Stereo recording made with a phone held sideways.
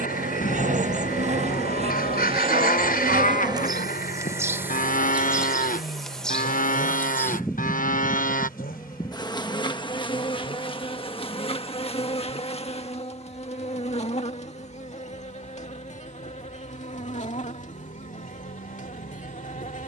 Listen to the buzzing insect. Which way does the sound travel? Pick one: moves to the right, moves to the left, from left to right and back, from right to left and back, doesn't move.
moves to the left.